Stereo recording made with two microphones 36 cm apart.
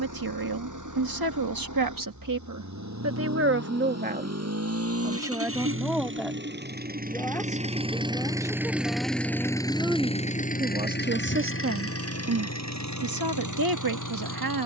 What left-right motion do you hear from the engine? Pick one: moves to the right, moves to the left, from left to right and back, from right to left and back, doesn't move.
moves to the left.